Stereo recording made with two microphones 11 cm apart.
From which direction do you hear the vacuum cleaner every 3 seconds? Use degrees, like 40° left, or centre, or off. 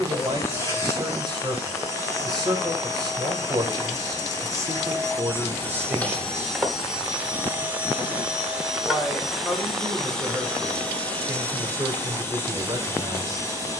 30° left, 30° left, 10° right, 10° left, 20° left.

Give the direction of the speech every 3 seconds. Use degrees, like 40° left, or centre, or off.
40° right, 30° right, 10° right, 10° right, 40° right.